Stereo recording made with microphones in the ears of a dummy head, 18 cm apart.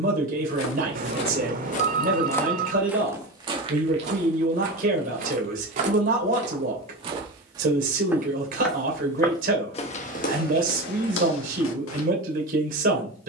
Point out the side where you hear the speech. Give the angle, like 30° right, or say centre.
40° right.